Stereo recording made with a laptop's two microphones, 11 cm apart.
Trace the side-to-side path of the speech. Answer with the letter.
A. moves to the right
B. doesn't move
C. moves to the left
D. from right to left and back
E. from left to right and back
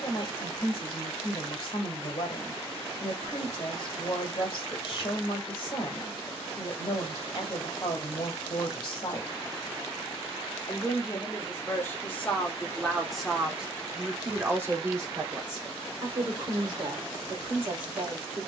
A.